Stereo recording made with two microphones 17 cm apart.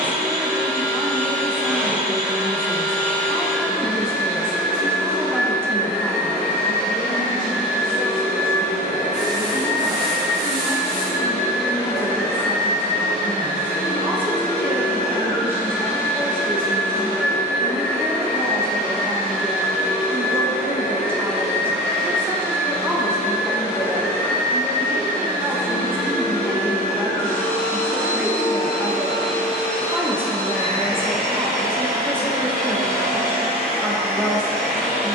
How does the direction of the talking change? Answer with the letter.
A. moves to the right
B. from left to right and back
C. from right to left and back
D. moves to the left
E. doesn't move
C.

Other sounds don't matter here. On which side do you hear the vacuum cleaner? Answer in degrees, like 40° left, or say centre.
10° left.